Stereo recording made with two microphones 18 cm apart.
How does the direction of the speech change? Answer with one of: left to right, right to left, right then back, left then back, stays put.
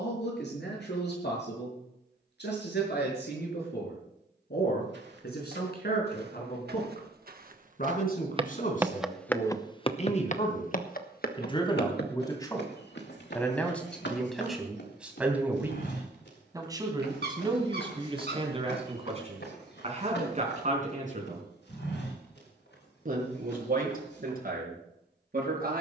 left to right.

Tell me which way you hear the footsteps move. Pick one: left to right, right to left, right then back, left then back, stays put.
right to left.